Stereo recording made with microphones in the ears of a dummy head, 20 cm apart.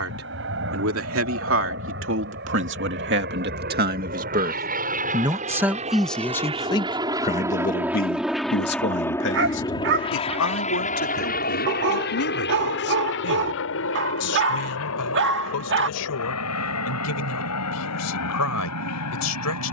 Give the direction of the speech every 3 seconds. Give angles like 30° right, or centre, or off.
60° right, 30° right, 30° left, 60° left, 70° left, 80° left, 80° left.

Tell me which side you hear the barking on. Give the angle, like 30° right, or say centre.
60° right.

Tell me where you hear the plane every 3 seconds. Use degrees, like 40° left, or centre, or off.
60° right, 40° right, 10° right, 30° left, 50° left, 70° left, 70° left.